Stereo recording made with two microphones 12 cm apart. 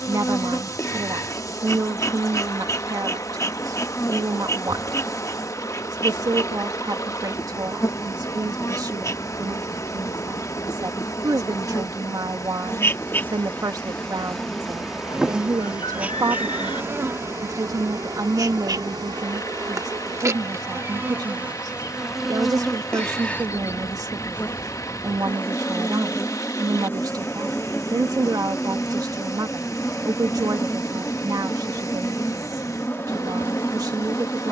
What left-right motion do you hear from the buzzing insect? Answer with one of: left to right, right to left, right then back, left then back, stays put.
right then back.